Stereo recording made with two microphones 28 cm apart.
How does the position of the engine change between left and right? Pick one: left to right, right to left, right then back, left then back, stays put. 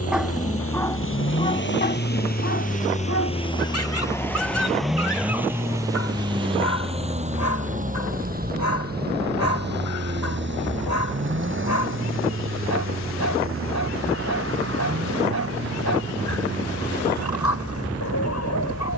left to right.